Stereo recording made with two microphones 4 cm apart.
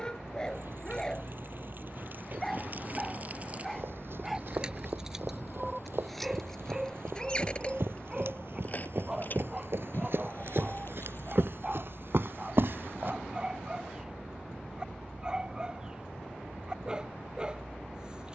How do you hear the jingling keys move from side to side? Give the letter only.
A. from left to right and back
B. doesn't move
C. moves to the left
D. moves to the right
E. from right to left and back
C.